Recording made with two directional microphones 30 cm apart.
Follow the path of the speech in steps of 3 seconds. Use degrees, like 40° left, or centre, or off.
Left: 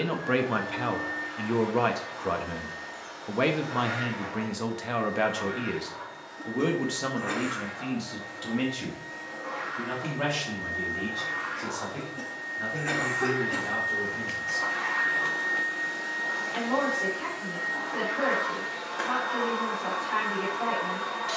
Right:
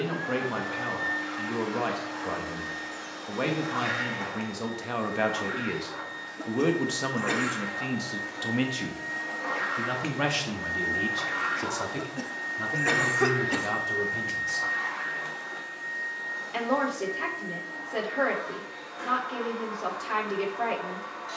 30° left, 10° left, 20° right, 40° right, 50° right, 50° right, 50° right.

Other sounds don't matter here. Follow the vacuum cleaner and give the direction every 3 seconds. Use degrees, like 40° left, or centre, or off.
60° right, 60° right, 60° right, 40° right, 10° right, 40° left, 60° left.